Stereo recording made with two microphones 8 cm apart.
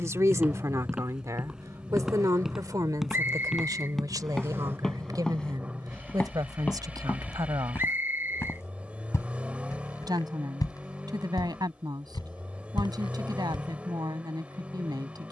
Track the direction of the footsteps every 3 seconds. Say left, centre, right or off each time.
centre, centre, left, left, left.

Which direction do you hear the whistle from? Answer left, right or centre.
right.